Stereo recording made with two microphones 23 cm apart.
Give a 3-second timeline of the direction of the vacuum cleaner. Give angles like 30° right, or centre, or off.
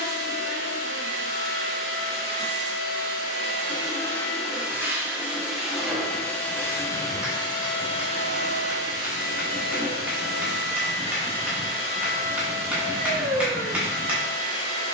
70° left, 10° left, 20° left, 50° left, 70° left.